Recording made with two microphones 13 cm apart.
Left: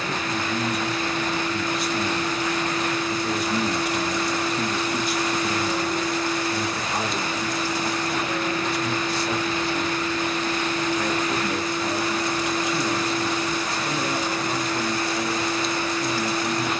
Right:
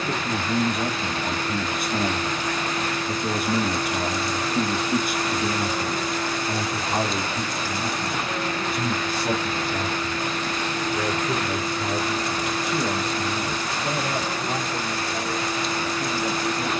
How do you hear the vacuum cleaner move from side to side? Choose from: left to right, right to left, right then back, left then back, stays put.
stays put.